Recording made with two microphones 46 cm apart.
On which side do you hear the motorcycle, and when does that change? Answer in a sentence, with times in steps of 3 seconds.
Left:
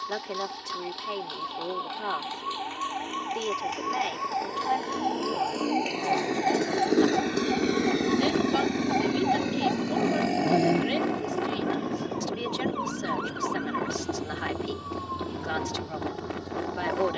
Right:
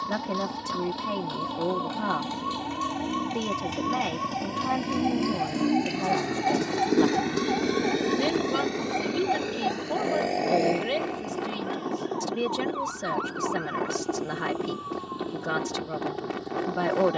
You can hear the motorcycle on the right from 0 s, in the centre from 6 s and on the left from 9 s.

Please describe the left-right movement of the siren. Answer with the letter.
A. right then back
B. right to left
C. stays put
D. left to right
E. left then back
B.